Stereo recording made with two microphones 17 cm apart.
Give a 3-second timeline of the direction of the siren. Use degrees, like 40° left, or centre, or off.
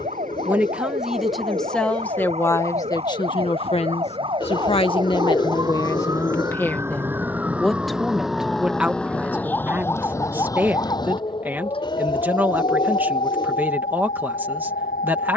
40° right, 30° right, 10° right, 20° left, 40° left.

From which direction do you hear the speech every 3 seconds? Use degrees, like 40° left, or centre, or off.
centre, 30° left, centre, 10° right, 10° right.